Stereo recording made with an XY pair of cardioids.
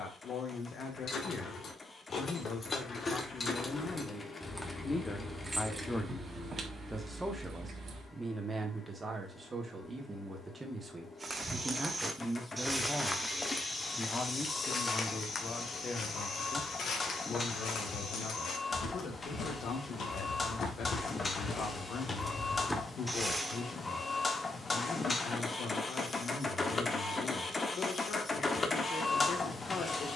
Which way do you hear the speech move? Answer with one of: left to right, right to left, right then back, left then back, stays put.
right then back.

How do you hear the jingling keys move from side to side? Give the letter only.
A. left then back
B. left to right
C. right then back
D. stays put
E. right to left
B.